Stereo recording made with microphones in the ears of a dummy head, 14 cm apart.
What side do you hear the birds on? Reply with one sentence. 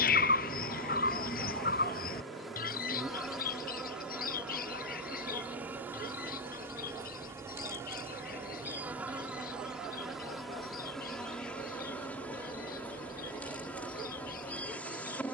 You can hear the birds on the left.